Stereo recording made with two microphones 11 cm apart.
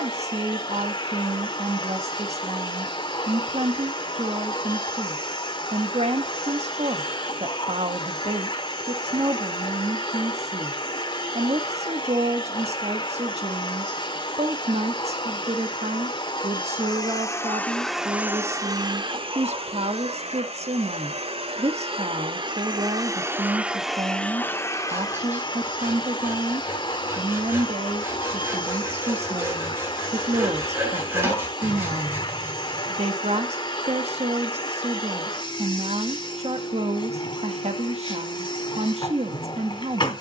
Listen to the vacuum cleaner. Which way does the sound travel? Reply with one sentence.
In this clip you hear the vacuum cleaner move from left to right and back again.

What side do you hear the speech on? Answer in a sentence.
You can hear the speech on the right.